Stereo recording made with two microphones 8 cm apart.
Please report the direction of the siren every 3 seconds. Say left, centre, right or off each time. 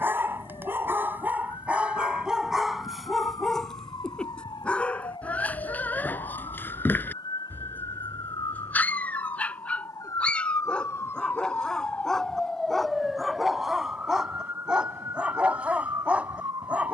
left, left, left, left, centre, right.